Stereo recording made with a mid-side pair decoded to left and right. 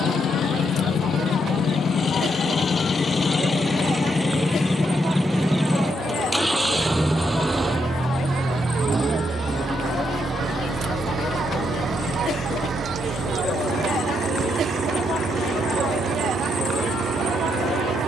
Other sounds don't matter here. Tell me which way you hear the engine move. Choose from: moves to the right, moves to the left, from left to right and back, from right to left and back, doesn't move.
moves to the right.